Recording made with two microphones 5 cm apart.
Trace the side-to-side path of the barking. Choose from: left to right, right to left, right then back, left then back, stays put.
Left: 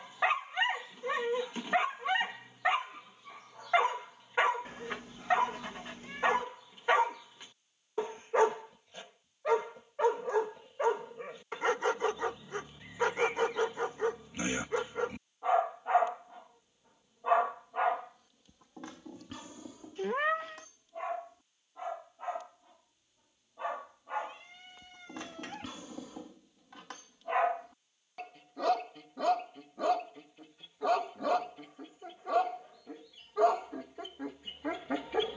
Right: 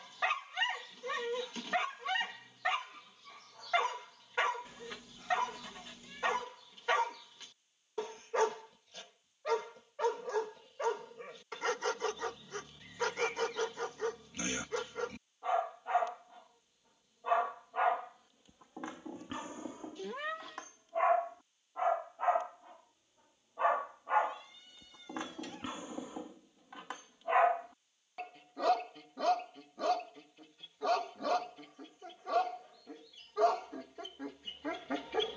right then back.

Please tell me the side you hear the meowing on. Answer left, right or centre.
left.